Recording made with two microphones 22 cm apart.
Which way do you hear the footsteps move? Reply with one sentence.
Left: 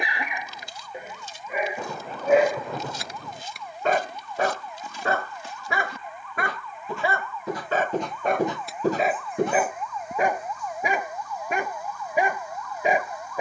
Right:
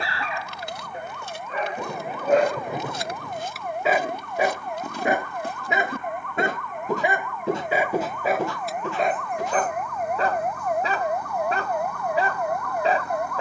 You can hear the footsteps travel towards the left.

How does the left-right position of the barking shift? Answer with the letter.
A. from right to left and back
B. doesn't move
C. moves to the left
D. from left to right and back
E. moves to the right
D.